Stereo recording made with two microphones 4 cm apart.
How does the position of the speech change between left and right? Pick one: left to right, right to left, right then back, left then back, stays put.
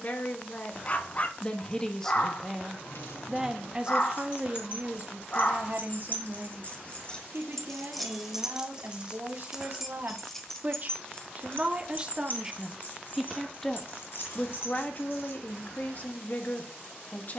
right then back.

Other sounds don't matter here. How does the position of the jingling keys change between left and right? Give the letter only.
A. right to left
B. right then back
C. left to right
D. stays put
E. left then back
B.